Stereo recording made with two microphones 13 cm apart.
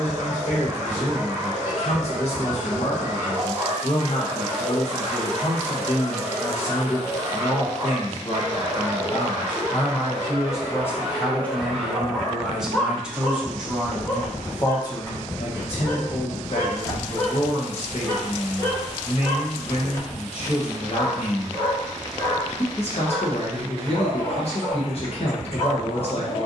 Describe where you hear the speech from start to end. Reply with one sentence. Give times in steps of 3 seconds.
You can hear the speech on the left from 0 s, in the centre from 12 s and on the left from 15 s.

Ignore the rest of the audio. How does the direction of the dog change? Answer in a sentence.
In this clip you hear the dog move to the left.